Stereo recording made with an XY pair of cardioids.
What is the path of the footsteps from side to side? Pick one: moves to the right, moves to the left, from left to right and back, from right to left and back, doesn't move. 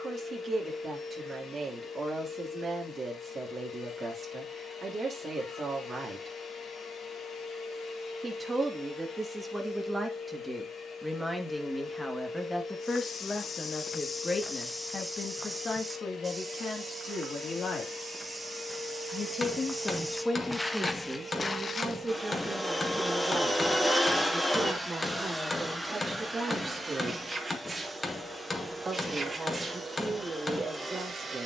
from left to right and back.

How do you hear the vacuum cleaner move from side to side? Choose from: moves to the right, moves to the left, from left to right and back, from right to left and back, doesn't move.
moves to the right.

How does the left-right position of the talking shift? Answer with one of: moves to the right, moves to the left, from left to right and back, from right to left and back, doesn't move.
from right to left and back.